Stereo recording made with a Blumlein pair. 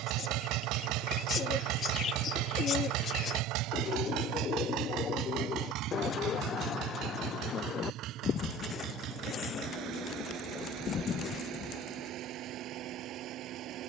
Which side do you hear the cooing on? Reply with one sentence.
You can hear the cooing on the left.